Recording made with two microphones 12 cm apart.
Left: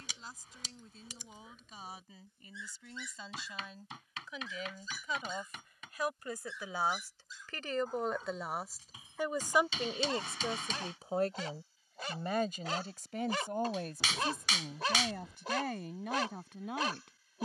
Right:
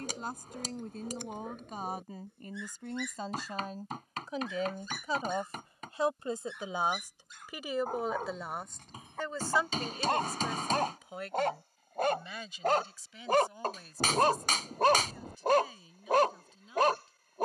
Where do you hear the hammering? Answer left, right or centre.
right.